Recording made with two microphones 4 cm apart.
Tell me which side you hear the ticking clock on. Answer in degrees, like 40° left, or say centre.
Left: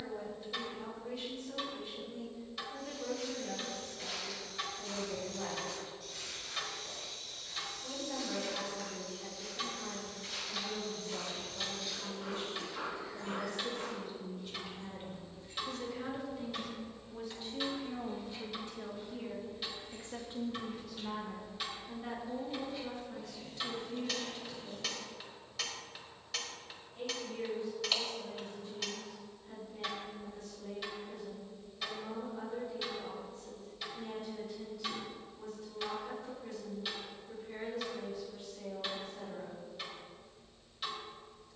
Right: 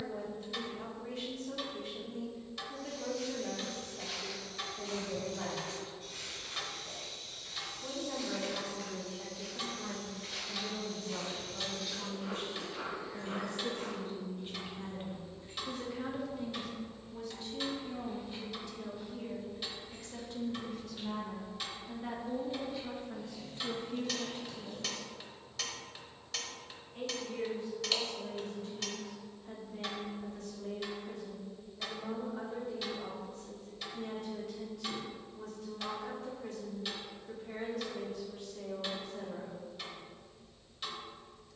centre.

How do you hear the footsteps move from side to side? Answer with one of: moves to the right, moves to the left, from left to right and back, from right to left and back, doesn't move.
from left to right and back.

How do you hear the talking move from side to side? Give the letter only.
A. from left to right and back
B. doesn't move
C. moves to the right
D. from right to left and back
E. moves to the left
D.